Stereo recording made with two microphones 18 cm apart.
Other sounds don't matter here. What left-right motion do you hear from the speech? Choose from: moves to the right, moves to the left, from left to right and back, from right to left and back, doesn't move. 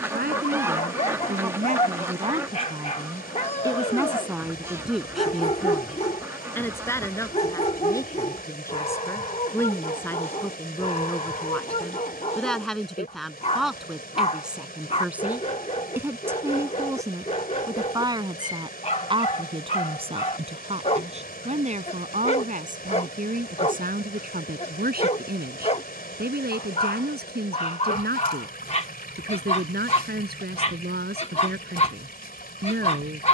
from right to left and back.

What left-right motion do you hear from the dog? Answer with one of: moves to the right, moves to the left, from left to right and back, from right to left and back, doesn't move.
doesn't move.